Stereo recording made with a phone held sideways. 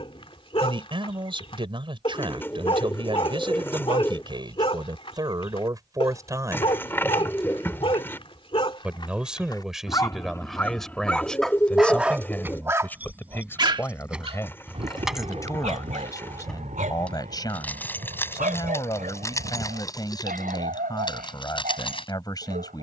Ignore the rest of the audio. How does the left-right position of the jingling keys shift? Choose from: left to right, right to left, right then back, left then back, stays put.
right to left.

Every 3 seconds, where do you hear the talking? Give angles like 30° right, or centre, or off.
40° right, 30° right, 20° right, centre, 10° left, 30° left, 30° left, 30° left.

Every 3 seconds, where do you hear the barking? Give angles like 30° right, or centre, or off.
40° left, 40° left, 40° left, 20° left, 30° right, 60° right, 70° right, 80° right.